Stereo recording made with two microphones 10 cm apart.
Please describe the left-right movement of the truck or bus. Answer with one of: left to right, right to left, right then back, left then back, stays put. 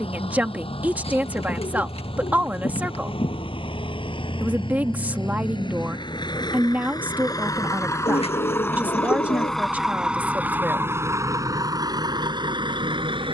left to right.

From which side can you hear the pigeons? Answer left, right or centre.
left.